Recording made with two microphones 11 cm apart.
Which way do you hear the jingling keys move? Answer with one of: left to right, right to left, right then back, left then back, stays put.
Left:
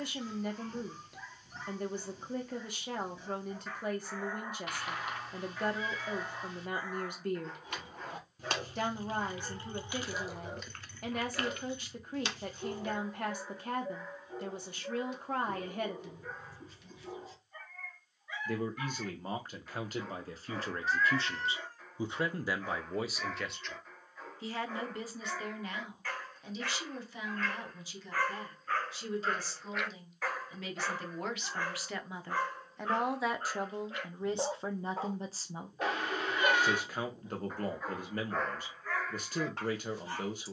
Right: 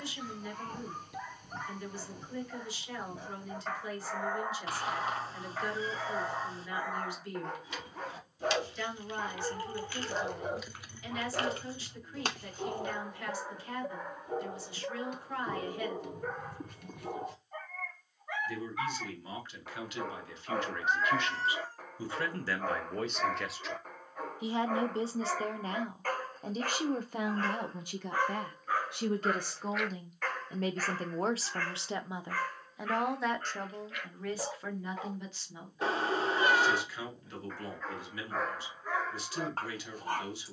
left to right.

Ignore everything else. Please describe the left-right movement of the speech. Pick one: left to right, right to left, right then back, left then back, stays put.
right then back.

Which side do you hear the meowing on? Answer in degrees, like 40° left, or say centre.
30° right.